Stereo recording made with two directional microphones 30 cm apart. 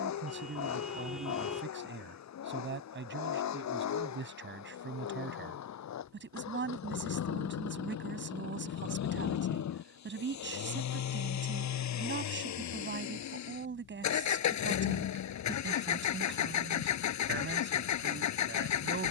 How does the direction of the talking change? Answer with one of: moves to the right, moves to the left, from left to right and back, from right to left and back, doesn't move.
doesn't move.